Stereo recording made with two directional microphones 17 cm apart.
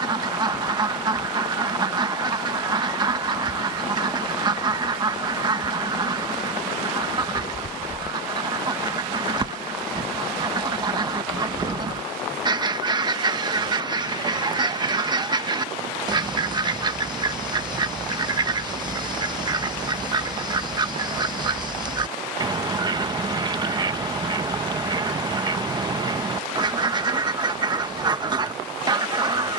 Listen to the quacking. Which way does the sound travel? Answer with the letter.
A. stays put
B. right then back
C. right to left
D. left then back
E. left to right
A.